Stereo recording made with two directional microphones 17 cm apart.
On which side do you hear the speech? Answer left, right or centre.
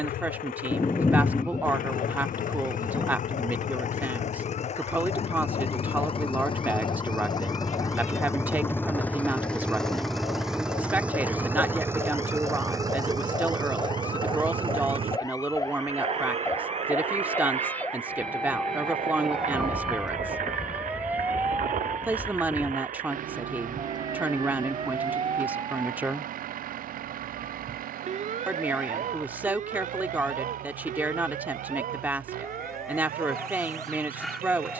centre.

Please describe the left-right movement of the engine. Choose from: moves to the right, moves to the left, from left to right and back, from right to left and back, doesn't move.
moves to the right.